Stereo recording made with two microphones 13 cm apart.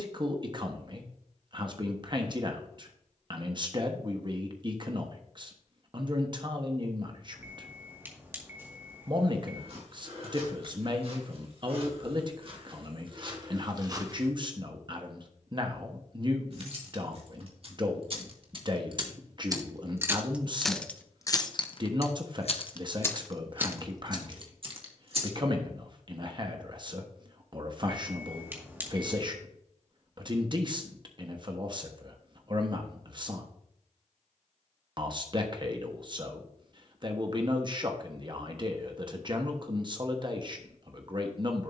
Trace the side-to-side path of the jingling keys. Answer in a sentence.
You can hear the jingling keys move from right to left and back again.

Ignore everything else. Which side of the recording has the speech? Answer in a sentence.
In this clip you hear the speech on the right.